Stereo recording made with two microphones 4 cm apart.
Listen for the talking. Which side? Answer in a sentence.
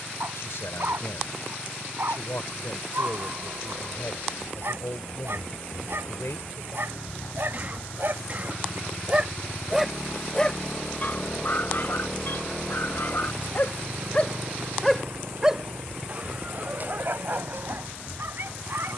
You can hear the talking on the left.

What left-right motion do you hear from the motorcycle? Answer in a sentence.
You can hear the motorcycle move from left to right.